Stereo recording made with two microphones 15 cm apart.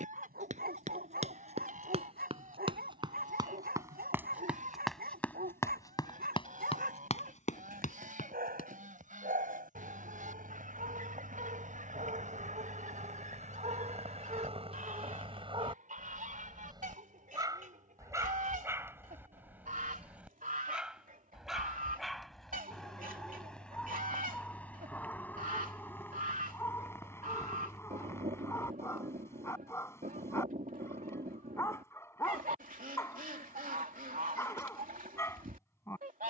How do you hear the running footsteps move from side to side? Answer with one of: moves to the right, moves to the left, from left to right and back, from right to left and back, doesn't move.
moves to the left.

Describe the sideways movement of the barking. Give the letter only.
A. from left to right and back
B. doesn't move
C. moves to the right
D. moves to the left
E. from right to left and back
D.